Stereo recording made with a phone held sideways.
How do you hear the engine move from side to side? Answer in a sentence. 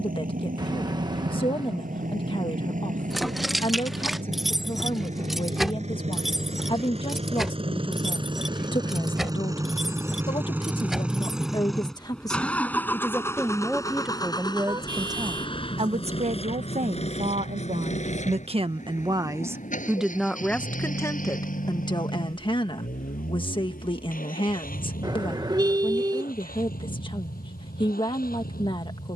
You can hear the engine go from the right side to the left.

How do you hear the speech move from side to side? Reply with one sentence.
In this clip you hear the speech go right and come back.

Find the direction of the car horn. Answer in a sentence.
You can hear the car horn on the right.